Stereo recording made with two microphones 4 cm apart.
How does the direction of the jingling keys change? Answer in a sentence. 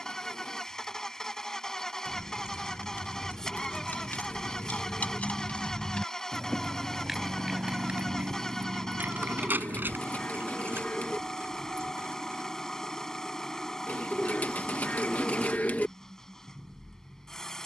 In this clip you hear the jingling keys travel towards the right.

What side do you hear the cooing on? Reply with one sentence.
In this clip you hear the cooing on the left.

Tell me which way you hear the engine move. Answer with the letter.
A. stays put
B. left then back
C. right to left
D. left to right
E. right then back
A.